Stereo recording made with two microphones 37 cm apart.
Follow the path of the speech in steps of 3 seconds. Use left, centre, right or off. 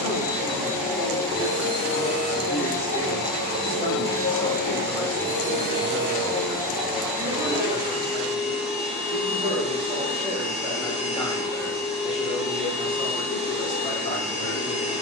left, centre, right, centre, left.